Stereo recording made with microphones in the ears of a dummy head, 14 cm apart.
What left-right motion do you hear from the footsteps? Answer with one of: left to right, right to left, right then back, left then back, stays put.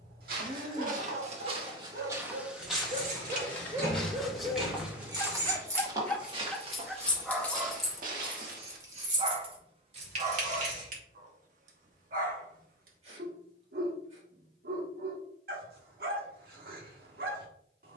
left then back.